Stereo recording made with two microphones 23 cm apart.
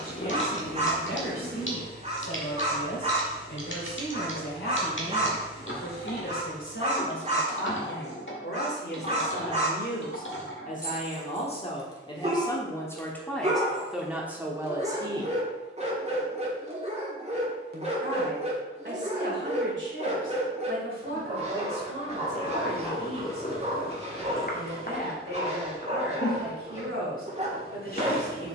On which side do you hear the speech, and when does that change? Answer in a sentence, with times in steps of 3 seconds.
In this clip you hear the speech on the left from 0 s, in the centre from 12 s and on the right from 15 s.